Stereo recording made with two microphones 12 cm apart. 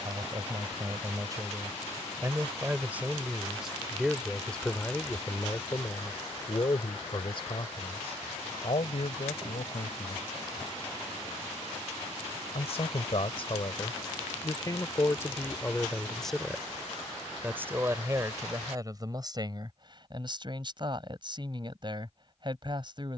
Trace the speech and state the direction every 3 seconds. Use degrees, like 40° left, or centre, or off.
30° right, 10° left, 40° left, 60° left, 40° left, centre, 30° right, 40° right.